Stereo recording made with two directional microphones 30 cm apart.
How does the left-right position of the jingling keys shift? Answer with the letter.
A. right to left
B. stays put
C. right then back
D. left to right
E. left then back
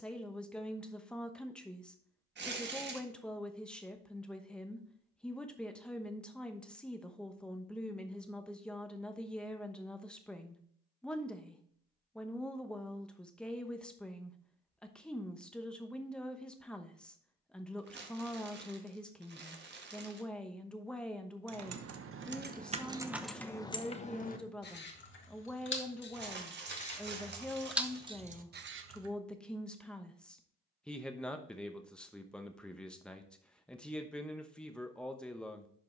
E.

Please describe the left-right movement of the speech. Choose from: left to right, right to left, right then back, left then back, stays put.
stays put.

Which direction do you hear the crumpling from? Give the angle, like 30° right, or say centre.
40° right.